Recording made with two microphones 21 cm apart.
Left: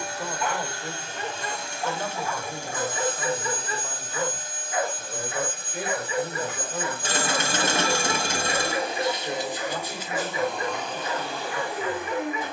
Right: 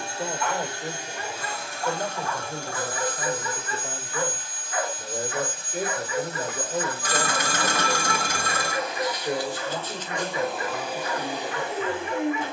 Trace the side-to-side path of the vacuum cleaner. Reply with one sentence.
You can hear the vacuum cleaner go left and come back.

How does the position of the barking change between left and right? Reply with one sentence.
In this clip you hear the barking stay in one place.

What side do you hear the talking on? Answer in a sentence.
In this clip you hear the talking on the right.